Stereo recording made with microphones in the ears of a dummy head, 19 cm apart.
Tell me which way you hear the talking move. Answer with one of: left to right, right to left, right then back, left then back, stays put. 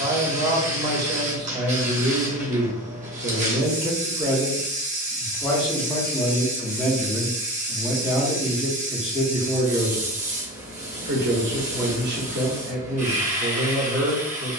left then back.